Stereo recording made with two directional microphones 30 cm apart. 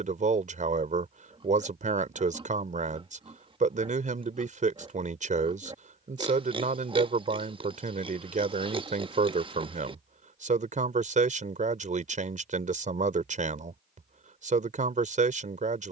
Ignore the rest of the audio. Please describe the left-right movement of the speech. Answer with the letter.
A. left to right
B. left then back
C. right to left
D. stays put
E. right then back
D.